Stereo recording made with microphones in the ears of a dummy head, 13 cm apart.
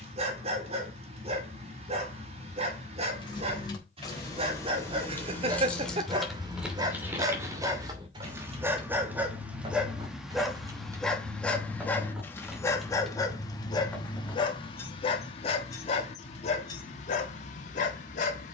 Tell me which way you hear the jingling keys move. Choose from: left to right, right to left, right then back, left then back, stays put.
right then back.